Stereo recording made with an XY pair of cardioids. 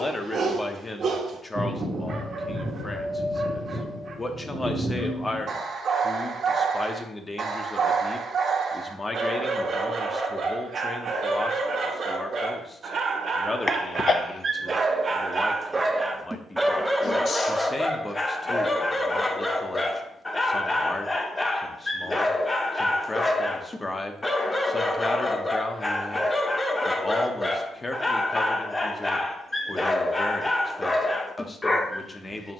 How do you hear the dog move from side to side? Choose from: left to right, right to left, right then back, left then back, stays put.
right to left.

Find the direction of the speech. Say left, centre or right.
left.